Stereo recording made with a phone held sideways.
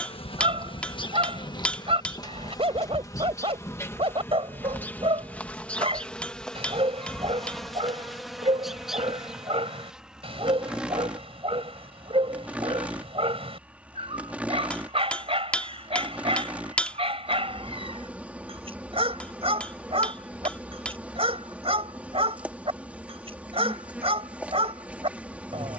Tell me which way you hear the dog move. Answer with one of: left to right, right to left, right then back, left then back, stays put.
stays put.